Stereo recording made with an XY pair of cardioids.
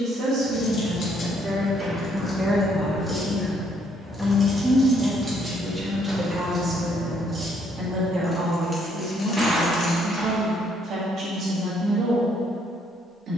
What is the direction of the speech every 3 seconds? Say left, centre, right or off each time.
right, centre, right, right, right.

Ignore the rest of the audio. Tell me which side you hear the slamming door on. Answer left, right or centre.
centre.